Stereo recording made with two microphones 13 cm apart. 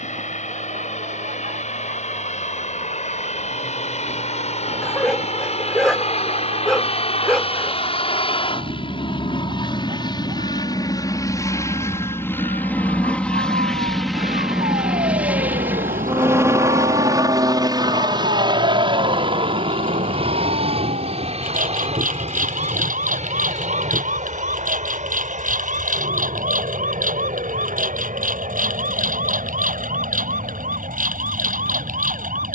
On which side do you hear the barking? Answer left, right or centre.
centre.